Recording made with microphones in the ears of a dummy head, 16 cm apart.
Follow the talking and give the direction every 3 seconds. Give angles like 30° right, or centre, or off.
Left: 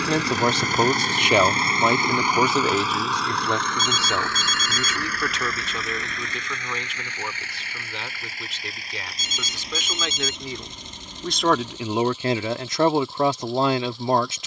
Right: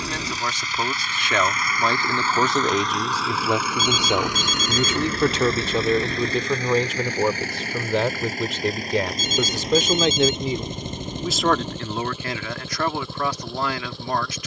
10° left, 20° right, 40° right, 20° right, 20° left.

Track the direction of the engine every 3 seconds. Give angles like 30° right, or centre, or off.
30° left, 10° right, 40° right, 40° right, 50° right.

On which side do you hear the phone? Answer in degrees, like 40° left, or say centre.
30° right.